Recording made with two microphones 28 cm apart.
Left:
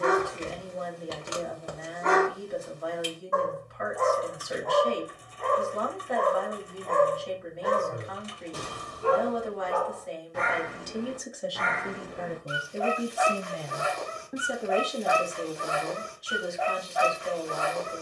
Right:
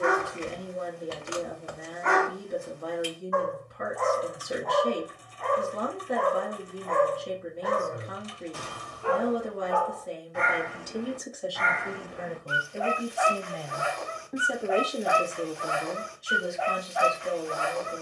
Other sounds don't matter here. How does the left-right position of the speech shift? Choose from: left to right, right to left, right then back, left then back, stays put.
left then back.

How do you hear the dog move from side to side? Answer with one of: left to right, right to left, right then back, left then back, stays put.
stays put.